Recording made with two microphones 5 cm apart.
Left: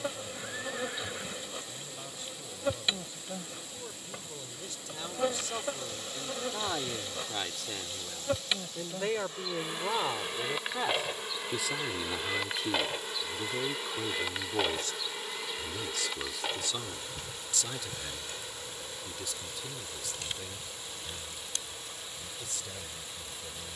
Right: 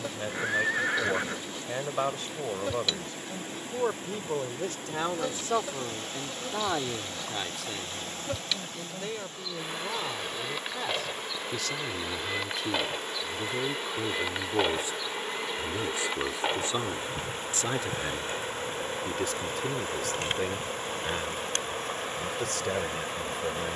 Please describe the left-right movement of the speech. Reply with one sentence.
In this clip you hear the speech go left and come back.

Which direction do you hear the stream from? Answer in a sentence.
You can hear the stream on the right.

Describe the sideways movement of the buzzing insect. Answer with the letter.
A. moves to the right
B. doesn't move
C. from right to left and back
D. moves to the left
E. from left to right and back
A.